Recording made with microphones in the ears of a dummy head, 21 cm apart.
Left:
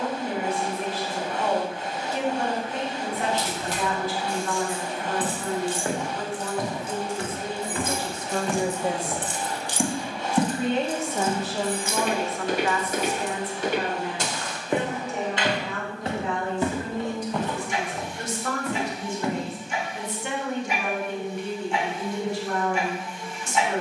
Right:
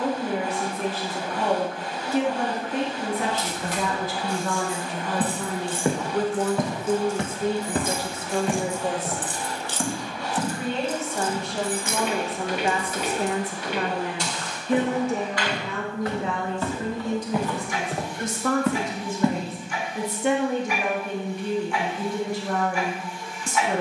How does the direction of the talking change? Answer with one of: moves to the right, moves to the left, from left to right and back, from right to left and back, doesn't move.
from right to left and back.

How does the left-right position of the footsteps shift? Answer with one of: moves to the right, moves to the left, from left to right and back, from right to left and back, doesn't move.
from right to left and back.